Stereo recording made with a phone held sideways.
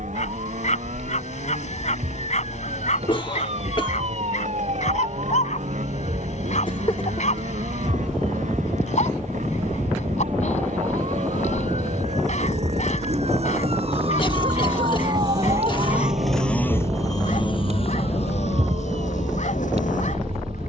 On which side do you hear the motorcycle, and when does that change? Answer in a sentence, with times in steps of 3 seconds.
You can hear the motorcycle on the right from 0 s, in the centre from 15 s and on the left from 18 s.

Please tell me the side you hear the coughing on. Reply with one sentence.
You can hear the coughing on the left.